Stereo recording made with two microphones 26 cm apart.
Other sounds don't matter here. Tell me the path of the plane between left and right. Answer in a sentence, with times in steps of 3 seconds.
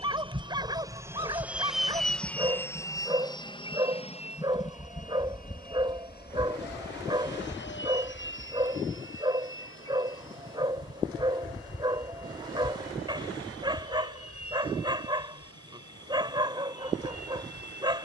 In this clip you hear the plane in the centre from 0 s and on the left from 3 s.